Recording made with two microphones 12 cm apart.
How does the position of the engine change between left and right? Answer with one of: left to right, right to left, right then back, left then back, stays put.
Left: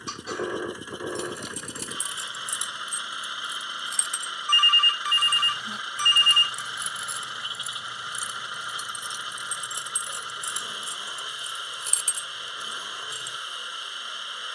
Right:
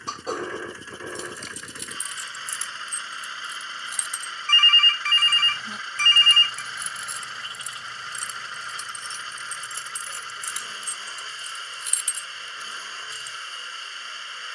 stays put.